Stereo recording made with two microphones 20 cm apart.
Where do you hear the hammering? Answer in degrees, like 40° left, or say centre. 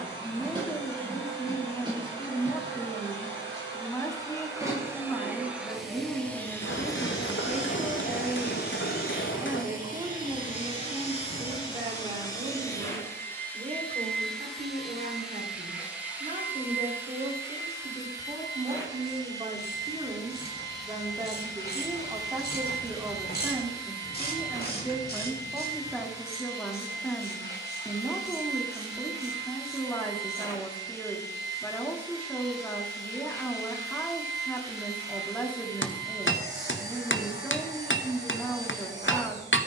70° left.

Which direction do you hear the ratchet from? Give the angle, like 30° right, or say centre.
50° left.